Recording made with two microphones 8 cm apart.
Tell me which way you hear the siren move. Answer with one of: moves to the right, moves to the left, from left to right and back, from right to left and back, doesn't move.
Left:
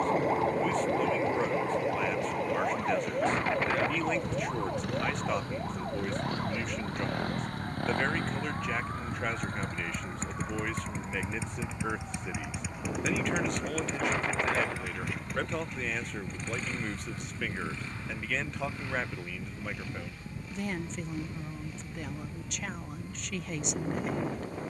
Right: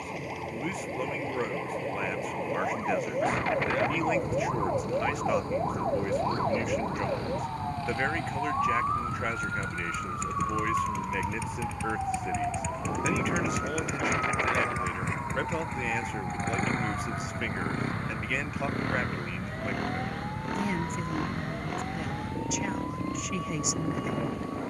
moves to the right.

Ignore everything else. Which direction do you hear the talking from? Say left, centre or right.
centre.